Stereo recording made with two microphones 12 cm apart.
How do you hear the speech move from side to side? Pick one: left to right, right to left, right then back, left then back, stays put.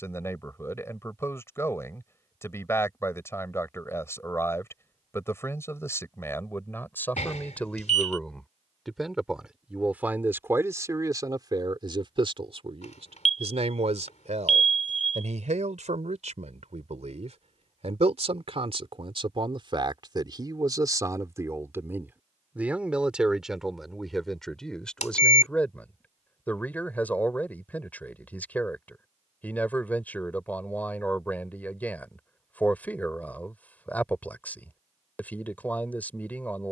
right then back.